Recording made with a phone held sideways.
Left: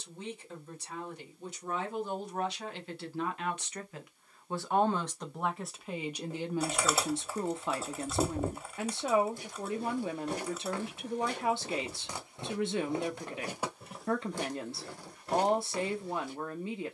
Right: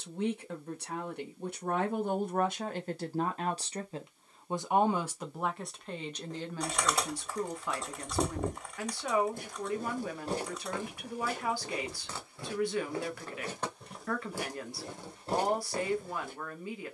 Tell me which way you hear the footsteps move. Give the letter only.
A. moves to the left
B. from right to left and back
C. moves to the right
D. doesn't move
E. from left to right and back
B.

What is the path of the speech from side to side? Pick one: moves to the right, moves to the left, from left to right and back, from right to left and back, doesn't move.
moves to the left.